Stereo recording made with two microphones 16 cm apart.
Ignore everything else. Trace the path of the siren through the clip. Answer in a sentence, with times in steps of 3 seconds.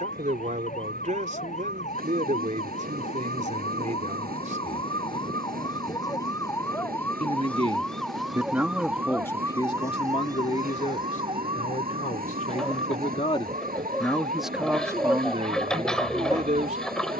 In this clip you hear the siren on the left from 0 s, in the centre from 6 s and on the right from 9 s.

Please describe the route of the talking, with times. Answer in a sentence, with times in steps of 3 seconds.
In this clip you hear the talking on the right from 0 s, on the left from 9 s and on the right from 15 s.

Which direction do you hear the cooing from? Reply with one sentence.
You can hear the cooing in the centre.